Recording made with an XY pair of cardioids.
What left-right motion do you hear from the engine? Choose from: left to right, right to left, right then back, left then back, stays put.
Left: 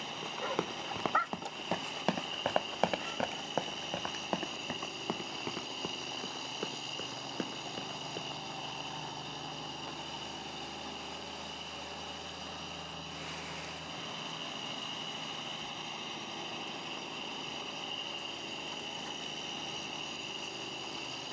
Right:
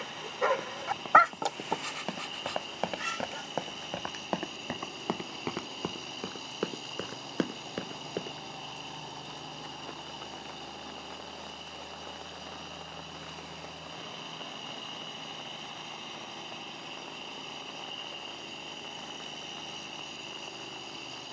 stays put.